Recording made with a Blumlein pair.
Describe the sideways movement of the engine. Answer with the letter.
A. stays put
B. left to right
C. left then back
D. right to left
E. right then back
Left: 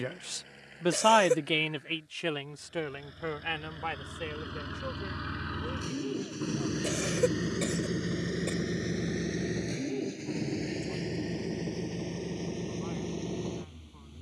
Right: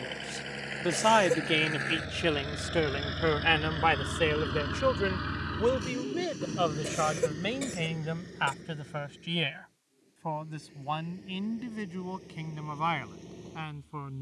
D.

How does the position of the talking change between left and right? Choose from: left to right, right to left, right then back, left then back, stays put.
left to right.